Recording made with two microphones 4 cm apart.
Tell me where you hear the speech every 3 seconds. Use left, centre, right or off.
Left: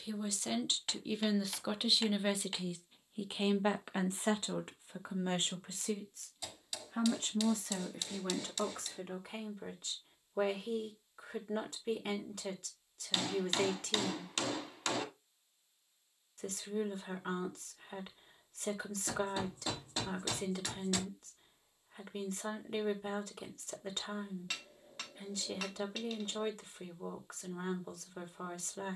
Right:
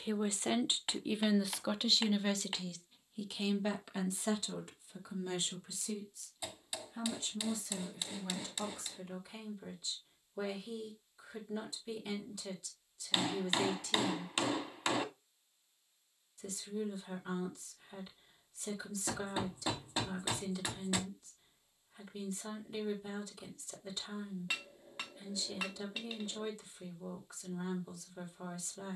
centre, left, left, left, left, left, left, left, left, left.